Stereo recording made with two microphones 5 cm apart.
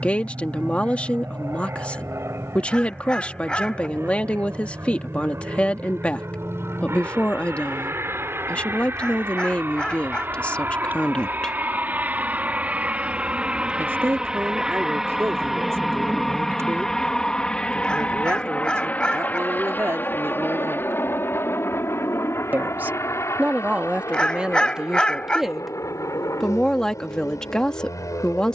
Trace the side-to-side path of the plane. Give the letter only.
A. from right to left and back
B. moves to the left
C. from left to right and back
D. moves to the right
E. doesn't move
B.